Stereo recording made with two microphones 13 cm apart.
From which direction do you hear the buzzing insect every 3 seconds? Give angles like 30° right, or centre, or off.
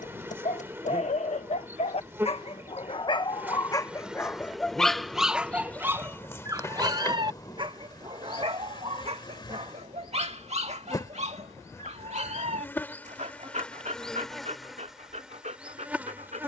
20° right, centre, 30° left, 30° left, 10° left, 10° right.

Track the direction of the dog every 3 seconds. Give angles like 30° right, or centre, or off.
60° left, 10° left, 40° right, 50° right, 60° right, 70° right.